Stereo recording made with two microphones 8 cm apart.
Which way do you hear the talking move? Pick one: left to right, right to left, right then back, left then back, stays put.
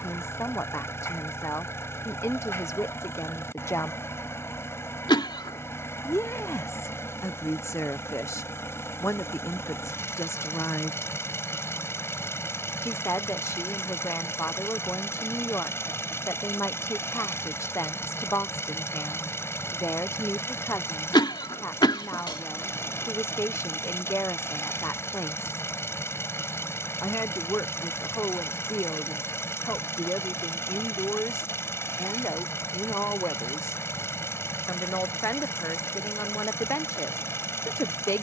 stays put.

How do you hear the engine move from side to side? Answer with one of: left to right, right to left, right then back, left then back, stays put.
stays put.